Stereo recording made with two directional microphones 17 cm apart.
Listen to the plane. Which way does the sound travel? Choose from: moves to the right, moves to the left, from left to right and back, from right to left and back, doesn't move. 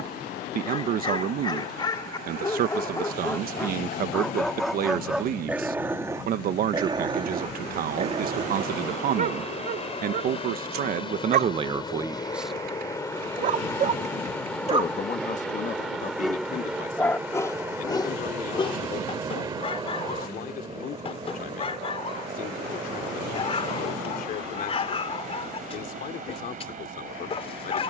moves to the right.